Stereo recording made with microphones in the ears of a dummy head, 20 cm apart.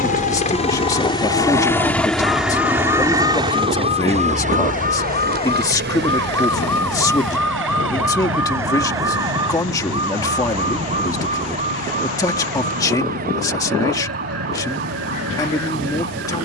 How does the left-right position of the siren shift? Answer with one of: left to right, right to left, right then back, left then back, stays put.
left to right.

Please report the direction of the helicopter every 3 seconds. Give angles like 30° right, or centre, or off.
10° left, 30° right, 60° right, 70° right, 70° right, 70° right.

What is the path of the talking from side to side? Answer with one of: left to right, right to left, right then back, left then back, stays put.
stays put.